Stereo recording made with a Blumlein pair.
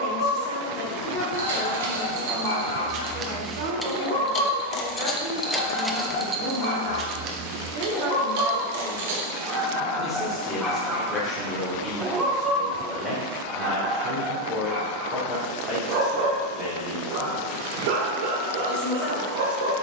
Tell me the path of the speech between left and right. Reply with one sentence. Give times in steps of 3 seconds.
You can hear the speech in the centre from 0 s, on the right from 3 s, in the centre from 9 s and on the left from 12 s.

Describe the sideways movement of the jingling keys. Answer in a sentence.
You can hear the jingling keys go left and come back.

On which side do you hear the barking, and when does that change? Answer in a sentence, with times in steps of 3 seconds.
In this clip you hear the barking on the left from 0 s, in the centre from 9 s and on the right from 12 s.